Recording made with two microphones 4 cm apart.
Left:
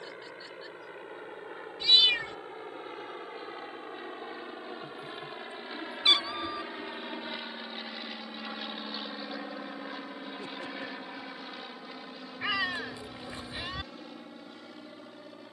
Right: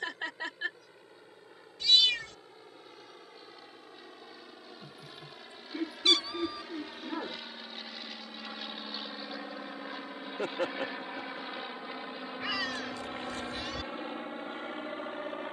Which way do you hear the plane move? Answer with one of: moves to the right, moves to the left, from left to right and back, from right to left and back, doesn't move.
moves to the right.